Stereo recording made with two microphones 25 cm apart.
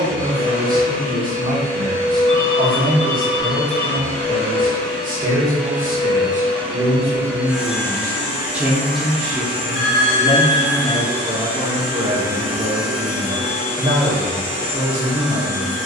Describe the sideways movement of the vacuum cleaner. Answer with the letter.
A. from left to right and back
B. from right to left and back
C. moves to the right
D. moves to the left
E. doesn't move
A.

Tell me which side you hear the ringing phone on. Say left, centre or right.
left.